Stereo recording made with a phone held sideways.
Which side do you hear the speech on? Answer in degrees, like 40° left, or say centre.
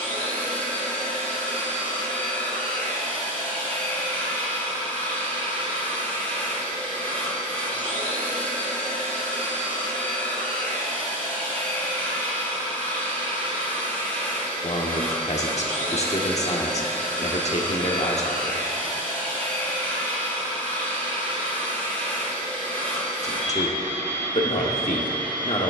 50° left.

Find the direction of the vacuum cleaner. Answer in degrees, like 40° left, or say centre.
10° left.